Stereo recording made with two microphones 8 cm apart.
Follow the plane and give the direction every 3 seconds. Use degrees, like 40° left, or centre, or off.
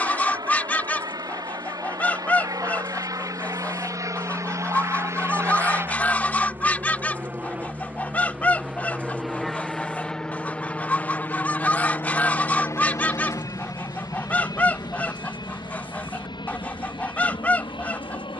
50° right, 40° right, 20° right, 10° left, 40° left, 60° left.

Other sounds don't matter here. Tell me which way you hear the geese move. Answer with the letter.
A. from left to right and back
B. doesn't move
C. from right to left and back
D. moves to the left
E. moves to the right
B.